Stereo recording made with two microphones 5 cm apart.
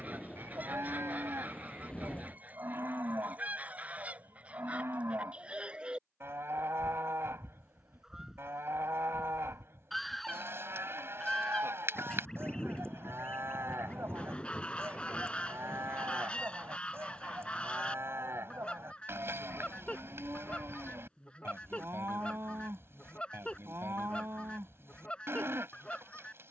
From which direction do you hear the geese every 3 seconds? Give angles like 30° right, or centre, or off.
30° right, 30° right, 10° right, 10° left, 20° left, 20° left, 20° left, 20° left, 20° left.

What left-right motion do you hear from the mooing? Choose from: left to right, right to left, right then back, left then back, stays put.
stays put.